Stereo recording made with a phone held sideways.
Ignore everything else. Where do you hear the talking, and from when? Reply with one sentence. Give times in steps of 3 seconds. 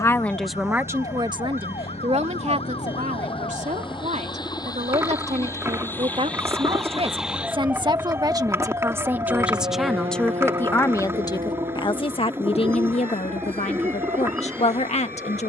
In this clip you hear the talking on the right from 0 s, in the centre from 9 s and on the left from 12 s.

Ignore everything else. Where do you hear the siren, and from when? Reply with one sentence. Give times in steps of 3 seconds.
You can hear the siren on the left from 0 s, in the centre from 6 s and on the right from 9 s.